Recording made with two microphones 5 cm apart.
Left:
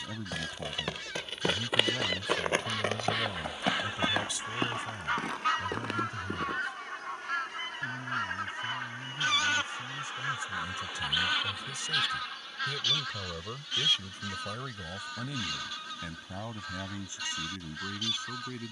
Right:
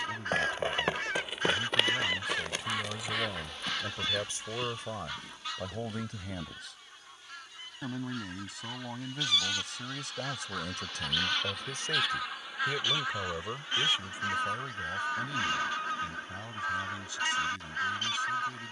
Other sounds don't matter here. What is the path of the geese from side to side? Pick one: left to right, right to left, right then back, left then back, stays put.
left then back.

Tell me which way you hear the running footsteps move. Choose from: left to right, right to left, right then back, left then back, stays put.
right to left.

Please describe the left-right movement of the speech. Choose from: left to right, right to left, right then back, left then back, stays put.
right then back.